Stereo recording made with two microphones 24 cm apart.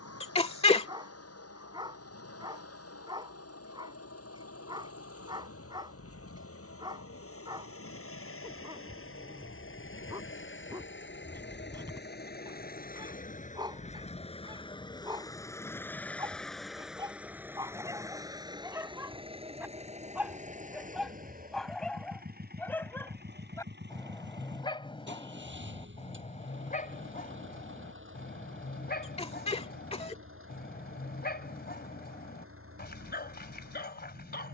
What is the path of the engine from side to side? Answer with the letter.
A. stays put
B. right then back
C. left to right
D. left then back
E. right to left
C.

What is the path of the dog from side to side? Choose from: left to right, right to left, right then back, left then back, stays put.
right to left.